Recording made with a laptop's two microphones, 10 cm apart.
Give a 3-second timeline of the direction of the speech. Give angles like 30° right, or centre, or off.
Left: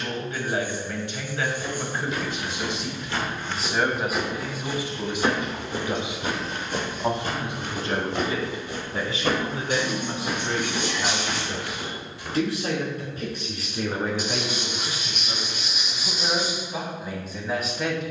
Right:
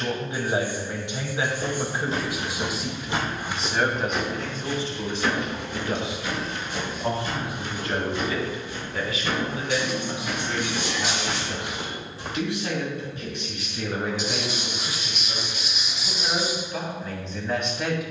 20° right, 10° left, 30° left, 40° left, 40° left, 20° left.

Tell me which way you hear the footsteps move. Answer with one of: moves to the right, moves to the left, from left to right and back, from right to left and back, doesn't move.
from right to left and back.